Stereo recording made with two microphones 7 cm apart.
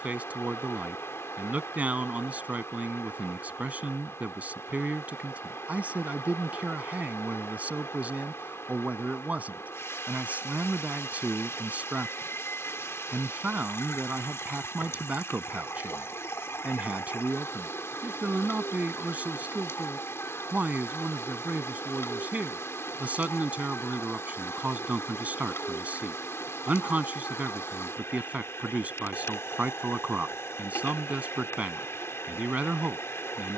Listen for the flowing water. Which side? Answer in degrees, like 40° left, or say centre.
40° left.